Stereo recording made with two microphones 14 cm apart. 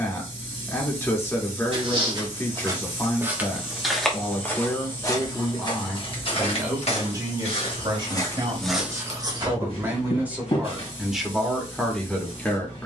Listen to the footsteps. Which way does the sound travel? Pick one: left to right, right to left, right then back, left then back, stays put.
left then back.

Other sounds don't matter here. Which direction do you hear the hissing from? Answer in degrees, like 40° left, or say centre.
50° left.